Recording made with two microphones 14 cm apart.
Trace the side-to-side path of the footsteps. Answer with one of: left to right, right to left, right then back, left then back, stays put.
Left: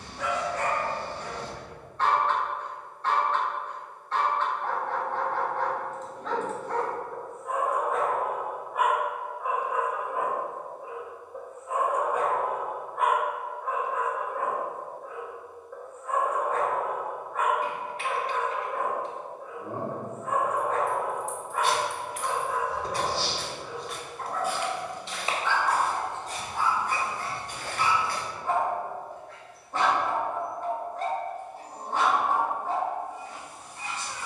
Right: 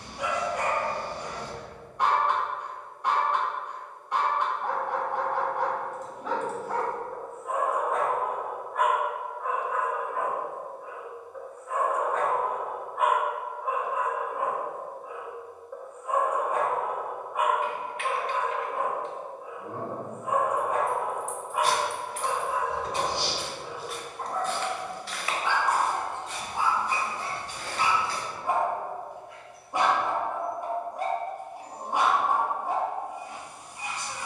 right to left.